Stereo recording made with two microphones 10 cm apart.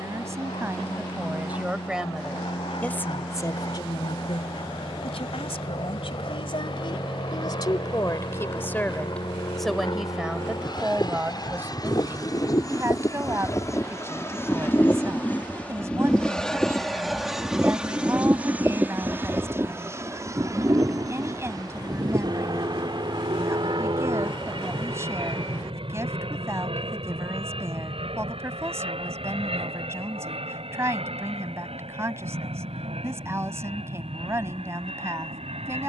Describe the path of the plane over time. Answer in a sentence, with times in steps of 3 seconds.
In this clip you hear the plane on the left from 0 s, in the centre from 15 s and on the right from 18 s.